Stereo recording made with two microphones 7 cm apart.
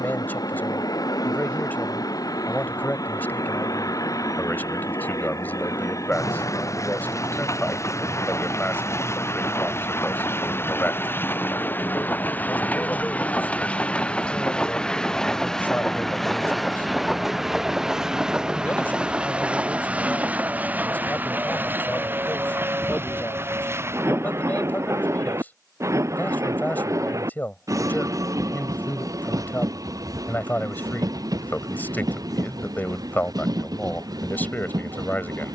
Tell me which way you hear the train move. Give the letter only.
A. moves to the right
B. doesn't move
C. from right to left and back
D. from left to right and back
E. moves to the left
A.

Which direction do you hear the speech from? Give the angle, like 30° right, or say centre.
30° left.